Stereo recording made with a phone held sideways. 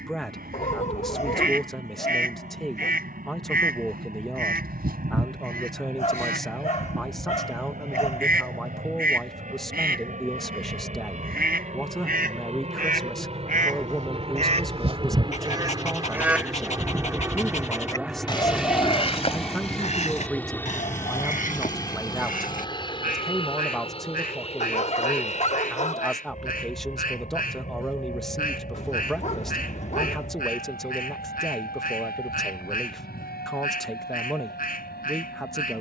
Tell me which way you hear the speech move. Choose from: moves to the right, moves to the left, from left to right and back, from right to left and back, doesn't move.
doesn't move.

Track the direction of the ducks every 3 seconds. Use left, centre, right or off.
right, right, right, right, right, centre, left, left, left, left, left, left.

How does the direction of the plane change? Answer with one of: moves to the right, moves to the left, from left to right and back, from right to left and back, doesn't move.
moves to the left.